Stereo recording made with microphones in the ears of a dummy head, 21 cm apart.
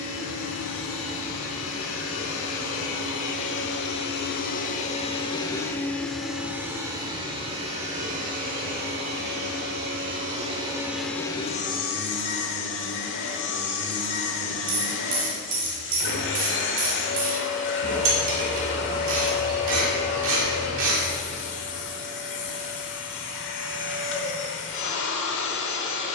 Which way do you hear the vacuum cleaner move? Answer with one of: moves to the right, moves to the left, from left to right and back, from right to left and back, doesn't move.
from left to right and back.